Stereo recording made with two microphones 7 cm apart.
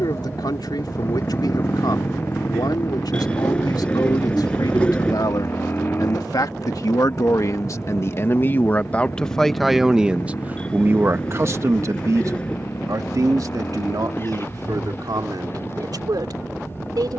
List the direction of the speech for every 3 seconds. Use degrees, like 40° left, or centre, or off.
70° left, 70° left, 50° left, 20° right, 60° right, 70° right.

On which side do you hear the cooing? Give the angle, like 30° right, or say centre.
20° left.